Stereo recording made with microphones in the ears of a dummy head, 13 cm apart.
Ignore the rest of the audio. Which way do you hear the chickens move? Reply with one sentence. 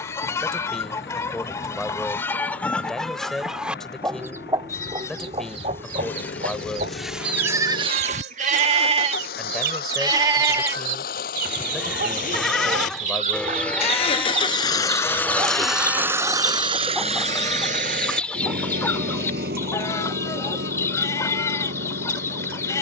You can hear the chickens move from left to right and back again.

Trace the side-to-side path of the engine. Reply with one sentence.
In this clip you hear the engine move to the right.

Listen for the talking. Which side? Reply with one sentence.
You can hear the talking in the centre.